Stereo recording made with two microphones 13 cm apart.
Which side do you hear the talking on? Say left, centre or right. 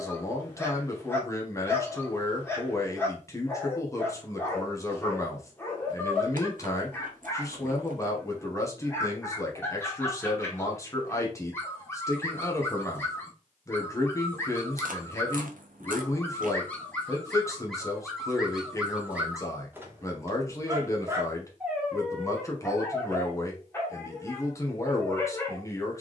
left.